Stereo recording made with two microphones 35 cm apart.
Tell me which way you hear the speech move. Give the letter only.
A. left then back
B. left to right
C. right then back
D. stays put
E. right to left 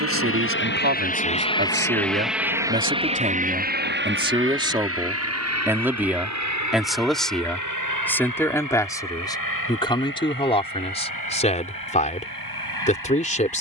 E.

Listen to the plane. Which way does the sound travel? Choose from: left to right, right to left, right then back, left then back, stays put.
left to right.